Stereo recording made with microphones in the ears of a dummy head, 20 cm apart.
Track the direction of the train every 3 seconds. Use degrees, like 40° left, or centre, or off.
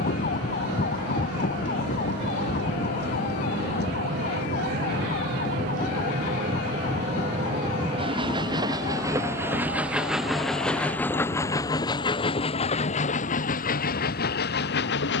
50° right, 40° right, 30° right, centre, 40° left.